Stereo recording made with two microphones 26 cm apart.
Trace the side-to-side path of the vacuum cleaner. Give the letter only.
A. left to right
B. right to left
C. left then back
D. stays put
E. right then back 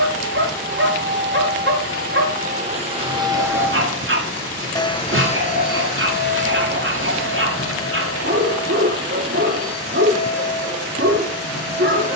B.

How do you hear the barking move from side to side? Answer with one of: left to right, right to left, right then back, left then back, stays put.
stays put.